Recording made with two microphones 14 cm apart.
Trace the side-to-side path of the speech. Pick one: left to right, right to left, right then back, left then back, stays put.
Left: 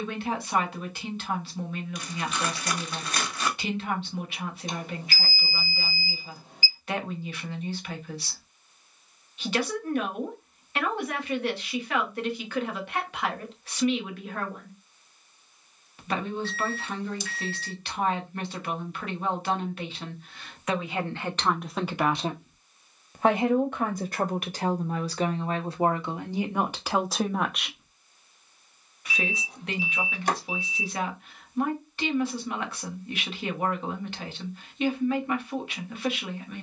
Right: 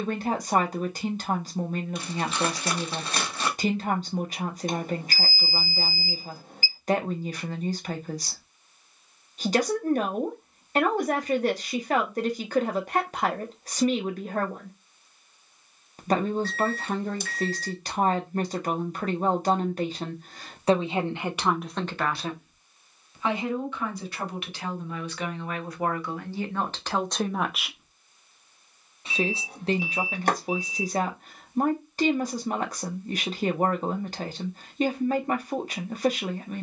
left then back.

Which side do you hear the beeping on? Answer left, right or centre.
right.